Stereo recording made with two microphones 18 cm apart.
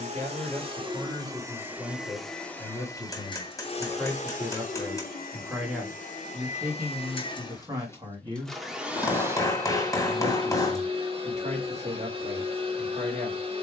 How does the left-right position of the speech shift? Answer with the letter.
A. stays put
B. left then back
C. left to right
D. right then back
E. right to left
C.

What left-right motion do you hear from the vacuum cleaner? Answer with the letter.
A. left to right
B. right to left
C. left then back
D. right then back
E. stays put
C.